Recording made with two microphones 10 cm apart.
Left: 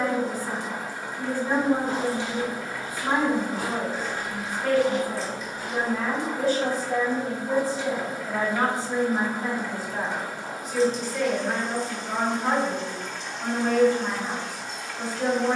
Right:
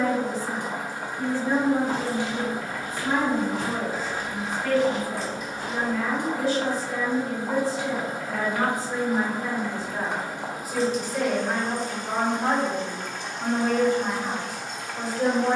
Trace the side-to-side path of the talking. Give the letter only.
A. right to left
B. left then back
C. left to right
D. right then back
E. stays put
C.